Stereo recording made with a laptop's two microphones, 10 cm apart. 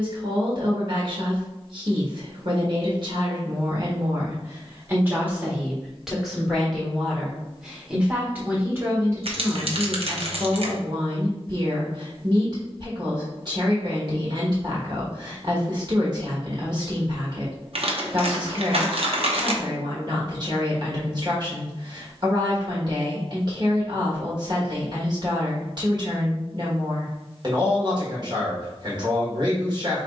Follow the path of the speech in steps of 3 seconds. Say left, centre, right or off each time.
right, right, centre, right, right, right, right, right, right, right.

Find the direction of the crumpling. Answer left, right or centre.
right.